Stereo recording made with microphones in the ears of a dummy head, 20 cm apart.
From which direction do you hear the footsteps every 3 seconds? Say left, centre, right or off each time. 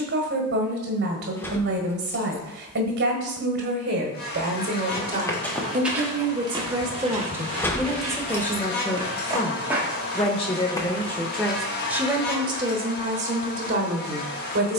off, centre, right, centre, off.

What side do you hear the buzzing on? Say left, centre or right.
left.